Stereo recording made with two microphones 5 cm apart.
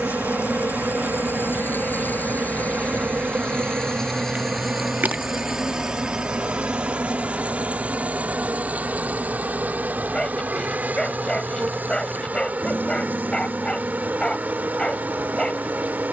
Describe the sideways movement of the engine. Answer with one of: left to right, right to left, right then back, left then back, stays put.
left to right.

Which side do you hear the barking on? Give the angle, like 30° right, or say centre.
20° left.